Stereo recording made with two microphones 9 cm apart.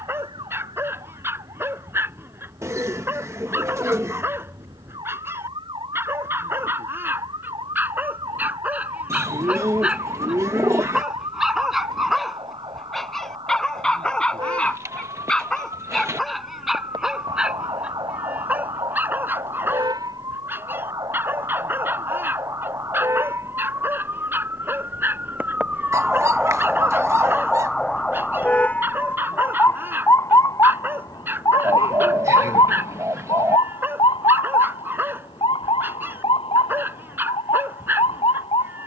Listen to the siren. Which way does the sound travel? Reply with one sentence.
You can hear the siren move to the left.